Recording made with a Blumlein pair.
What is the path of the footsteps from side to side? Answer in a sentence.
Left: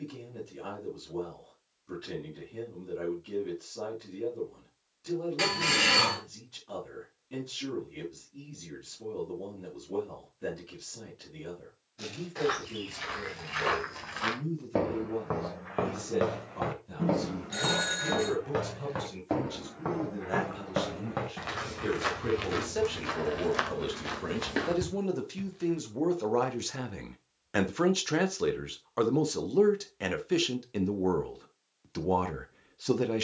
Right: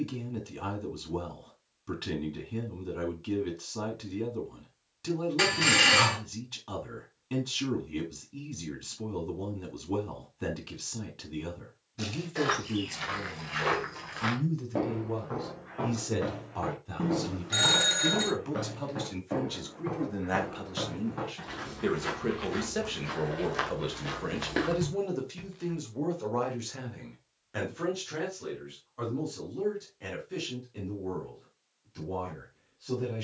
In this clip you hear the footsteps move from right to left and back again.